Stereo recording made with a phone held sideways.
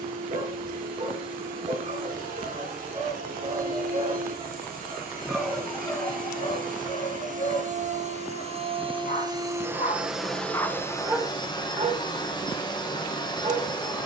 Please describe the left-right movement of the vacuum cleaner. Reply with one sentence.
In this clip you hear the vacuum cleaner go from the right side to the left.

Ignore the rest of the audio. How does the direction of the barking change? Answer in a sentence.
You can hear the barking go left and come back.